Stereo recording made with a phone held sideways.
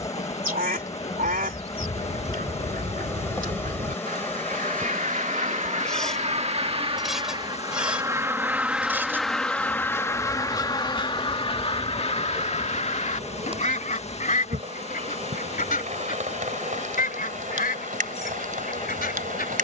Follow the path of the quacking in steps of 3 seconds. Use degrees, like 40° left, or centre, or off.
70° right, 60° right, 30° right, 20° left, 50° left, 70° left, 70° left.